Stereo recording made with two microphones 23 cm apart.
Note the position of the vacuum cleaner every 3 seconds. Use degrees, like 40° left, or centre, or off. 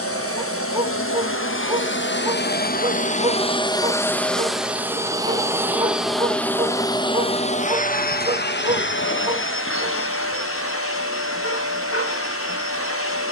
60° left, centre, 30° left, 70° left, 70° left.